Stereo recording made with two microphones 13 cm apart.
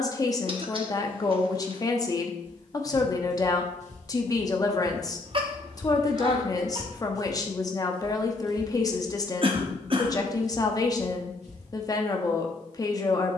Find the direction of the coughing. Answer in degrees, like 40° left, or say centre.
40° right.